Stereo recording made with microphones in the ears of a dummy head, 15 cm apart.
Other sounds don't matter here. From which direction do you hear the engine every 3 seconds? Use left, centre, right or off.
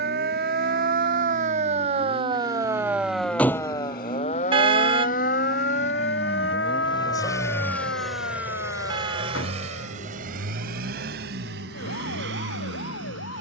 left, left, centre, right, right.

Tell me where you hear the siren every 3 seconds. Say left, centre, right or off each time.
right, left, left, left, left.